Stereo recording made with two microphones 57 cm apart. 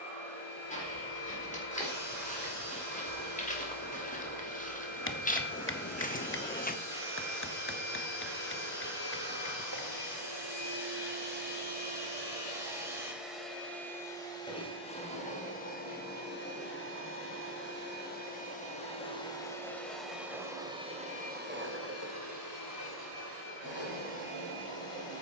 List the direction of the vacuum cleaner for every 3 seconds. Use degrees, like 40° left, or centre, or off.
70° right, 70° right, 60° right, 30° right, centre, 20° left, centre, 30° right, 60° right.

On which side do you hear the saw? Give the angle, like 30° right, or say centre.
centre.